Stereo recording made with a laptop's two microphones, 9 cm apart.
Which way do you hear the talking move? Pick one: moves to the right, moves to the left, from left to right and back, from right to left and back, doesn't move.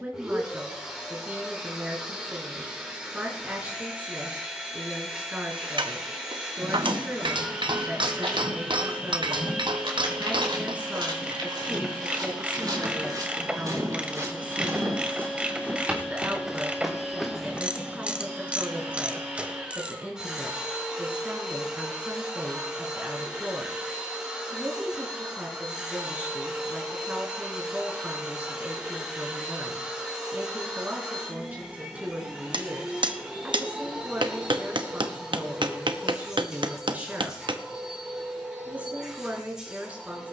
doesn't move.